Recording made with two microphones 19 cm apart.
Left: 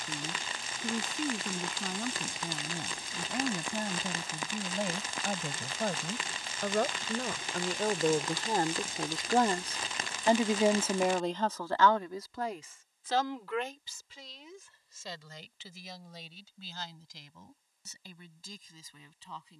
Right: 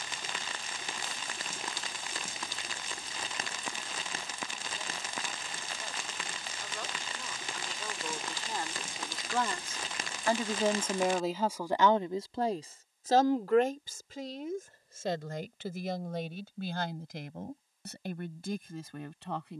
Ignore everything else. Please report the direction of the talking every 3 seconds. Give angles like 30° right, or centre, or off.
80° left, 80° left, 60° left, 10° left, 50° right, 70° right, 70° right.